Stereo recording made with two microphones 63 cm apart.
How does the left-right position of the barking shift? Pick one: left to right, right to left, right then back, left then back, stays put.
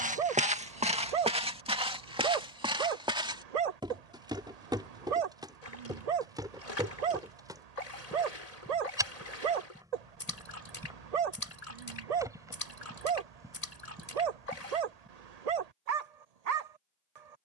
stays put.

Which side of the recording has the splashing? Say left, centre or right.
left.